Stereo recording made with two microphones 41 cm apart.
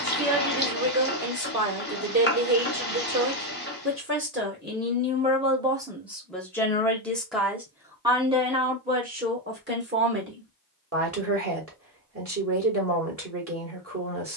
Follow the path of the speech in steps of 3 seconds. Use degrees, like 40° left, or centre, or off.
40° right, 20° right, centre, 30° right, 30° right.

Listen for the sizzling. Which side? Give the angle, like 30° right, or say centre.
20° left.